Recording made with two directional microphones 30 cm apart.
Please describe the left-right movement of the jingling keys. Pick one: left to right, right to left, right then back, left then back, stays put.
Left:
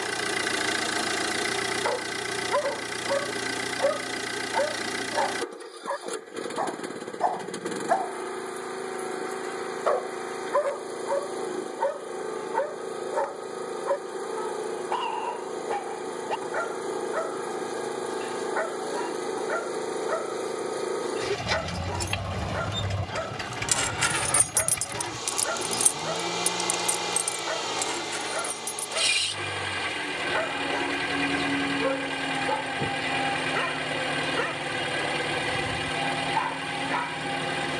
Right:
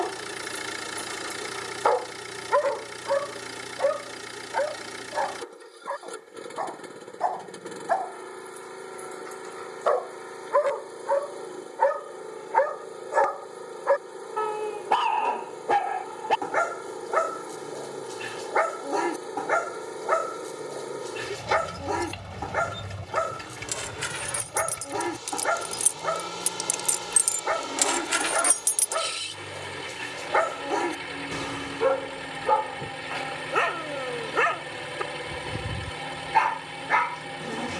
left to right.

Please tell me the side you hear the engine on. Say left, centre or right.
left.